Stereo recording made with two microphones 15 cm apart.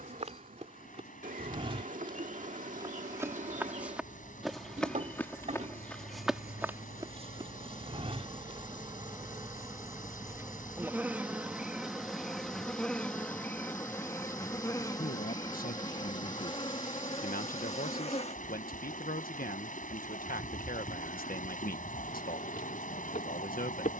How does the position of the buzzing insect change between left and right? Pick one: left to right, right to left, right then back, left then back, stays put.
right to left.